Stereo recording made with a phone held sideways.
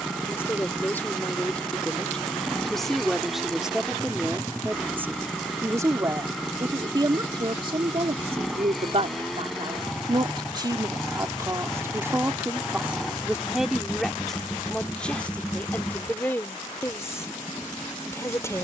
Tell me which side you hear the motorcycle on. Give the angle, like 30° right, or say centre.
centre.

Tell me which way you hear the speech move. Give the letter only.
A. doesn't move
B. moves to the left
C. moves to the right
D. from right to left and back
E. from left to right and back
E.